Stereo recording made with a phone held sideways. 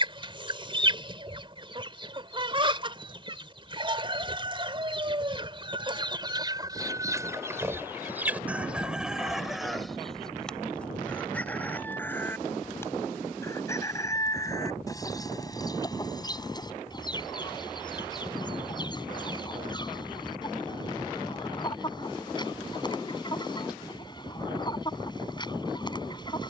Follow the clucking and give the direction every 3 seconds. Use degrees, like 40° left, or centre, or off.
30° right, 30° right, 20° right, centre, 20° left, 30° left, 30° left, 30° left, 30° left.